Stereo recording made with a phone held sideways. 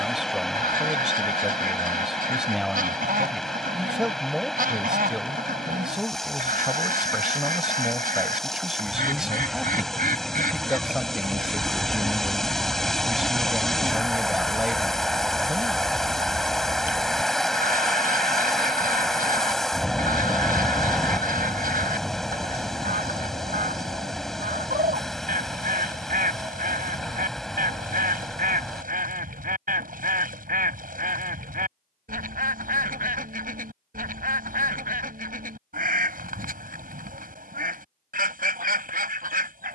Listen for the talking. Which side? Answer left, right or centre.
centre.